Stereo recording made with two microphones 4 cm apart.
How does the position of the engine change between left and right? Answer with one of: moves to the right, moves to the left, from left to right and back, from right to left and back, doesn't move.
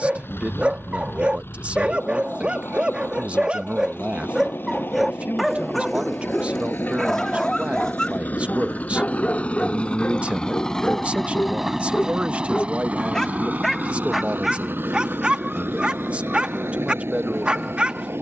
moves to the right.